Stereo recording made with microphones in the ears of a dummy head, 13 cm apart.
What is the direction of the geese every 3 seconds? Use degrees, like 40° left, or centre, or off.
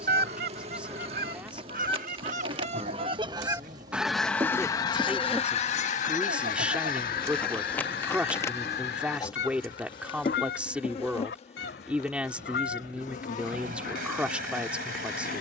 60° right, 10° left, 60° left, 80° left, 80° left.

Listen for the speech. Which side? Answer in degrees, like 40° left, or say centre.
10° right.